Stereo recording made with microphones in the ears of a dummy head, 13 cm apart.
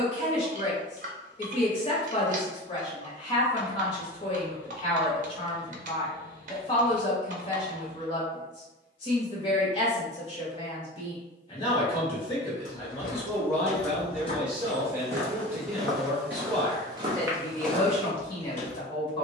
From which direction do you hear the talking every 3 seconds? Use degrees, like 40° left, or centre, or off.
40° left, 40° left, 40° left, 40° left, 10° left, centre, 30° left.